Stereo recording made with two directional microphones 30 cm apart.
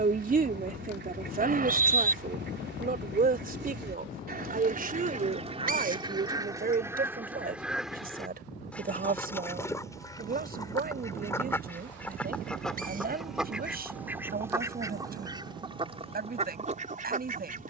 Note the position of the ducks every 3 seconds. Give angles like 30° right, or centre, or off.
30° right, 30° right, 10° right, 10° left, centre, 20° right.